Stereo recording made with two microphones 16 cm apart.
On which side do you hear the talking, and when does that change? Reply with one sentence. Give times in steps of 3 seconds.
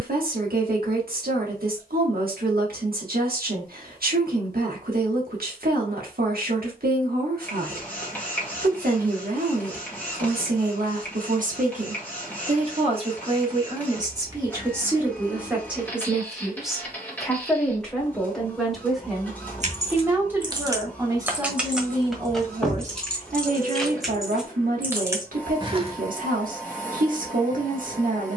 In this clip you hear the talking on the right from 0 s, in the centre from 15 s and on the right from 21 s.